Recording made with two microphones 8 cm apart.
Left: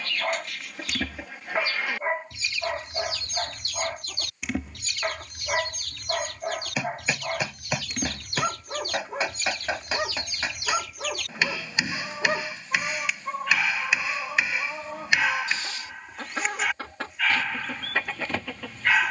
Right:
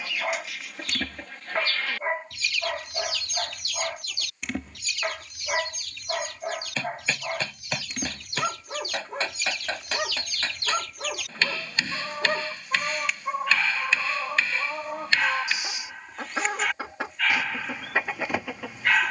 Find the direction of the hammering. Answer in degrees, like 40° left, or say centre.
10° left.